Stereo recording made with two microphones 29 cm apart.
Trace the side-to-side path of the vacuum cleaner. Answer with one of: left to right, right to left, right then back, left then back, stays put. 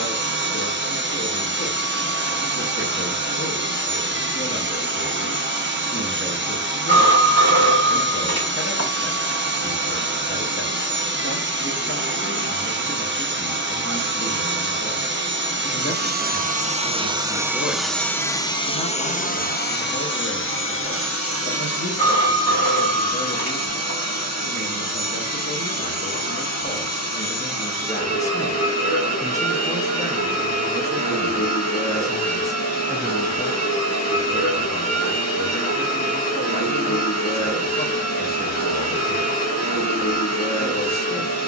right to left.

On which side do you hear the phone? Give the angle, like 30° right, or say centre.
60° left.